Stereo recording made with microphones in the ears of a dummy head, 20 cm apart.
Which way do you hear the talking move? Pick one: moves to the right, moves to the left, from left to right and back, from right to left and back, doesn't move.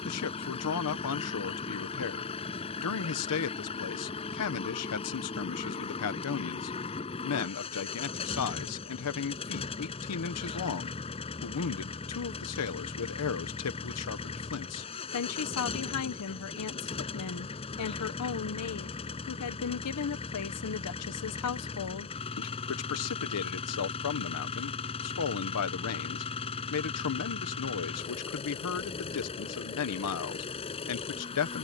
doesn't move.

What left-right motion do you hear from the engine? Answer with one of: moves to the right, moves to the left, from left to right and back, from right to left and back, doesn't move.
doesn't move.